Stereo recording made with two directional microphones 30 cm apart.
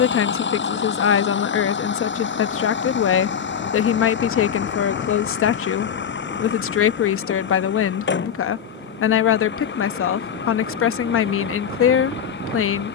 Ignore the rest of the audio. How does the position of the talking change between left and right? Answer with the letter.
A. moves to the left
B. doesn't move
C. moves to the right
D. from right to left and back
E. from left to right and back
B.